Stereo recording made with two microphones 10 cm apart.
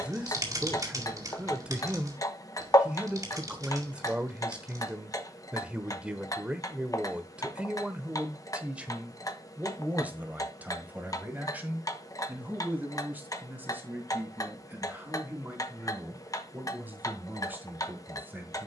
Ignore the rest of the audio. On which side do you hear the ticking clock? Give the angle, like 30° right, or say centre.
40° left.